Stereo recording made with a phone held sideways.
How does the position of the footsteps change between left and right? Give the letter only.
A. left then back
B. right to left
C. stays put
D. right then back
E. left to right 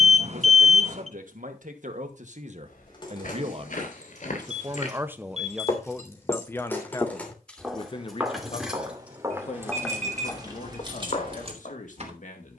D.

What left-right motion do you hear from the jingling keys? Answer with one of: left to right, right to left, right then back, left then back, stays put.
left to right.